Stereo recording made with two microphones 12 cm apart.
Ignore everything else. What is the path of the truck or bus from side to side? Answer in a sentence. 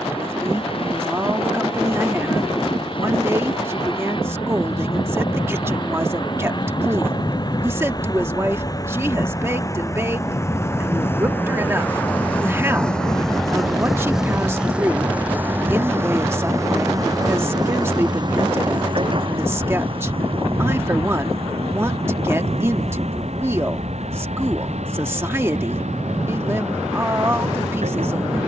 In this clip you hear the truck or bus travel towards the right.